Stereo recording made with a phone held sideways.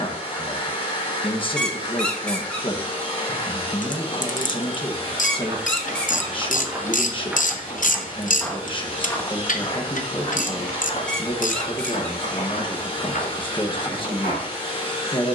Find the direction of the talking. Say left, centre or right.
left.